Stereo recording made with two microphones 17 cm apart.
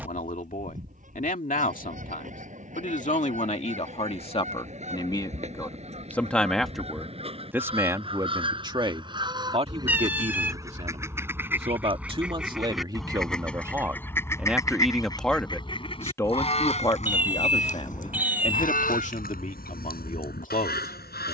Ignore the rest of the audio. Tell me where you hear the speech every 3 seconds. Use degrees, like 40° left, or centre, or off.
50° left, 30° left, 10° right, 40° right, 20° right, 20° left, 50° left.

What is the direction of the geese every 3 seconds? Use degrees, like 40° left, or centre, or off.
50° right, 40° right, 30° right, 20° right, 10° left, 40° left, 60° left.